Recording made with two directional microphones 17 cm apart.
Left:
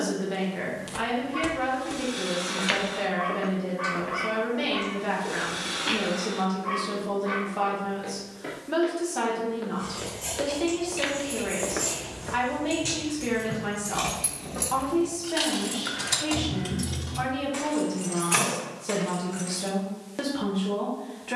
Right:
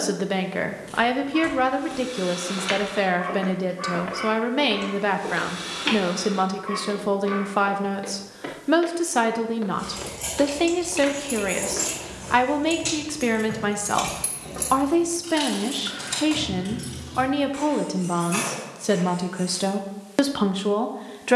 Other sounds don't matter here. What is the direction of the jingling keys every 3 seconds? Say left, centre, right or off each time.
off, off, off, right, right, left, left.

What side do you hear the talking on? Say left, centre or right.
right.